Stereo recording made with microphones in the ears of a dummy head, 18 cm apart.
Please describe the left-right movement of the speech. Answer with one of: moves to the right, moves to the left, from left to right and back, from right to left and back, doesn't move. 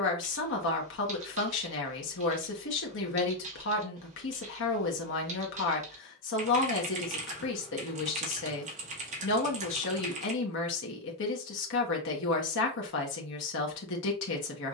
doesn't move.